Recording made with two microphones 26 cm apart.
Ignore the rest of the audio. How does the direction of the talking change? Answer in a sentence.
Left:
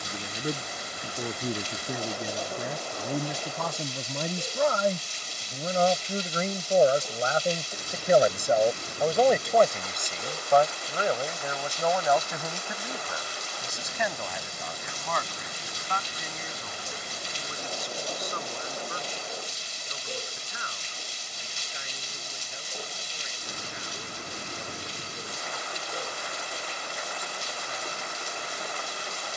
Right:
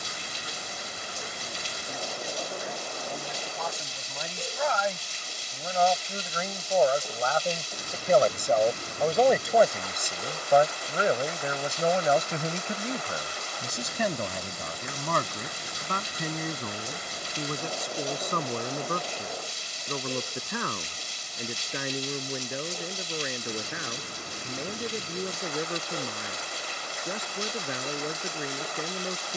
In this clip you hear the talking move from left to right.